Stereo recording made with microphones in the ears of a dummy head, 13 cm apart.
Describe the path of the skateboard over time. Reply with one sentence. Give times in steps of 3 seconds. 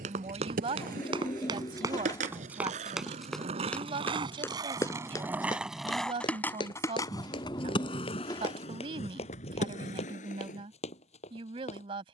In this clip you hear the skateboard on the right from 0 s and on the left from 6 s.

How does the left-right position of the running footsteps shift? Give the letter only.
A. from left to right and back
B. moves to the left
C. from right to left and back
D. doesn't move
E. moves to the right
B.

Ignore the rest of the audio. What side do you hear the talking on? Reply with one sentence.
In this clip you hear the talking on the right.